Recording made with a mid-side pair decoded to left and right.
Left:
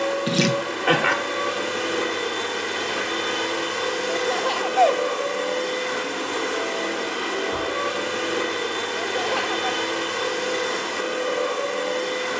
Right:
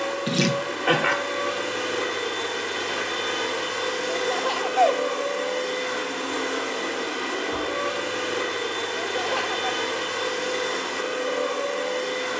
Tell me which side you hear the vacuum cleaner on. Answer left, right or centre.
centre.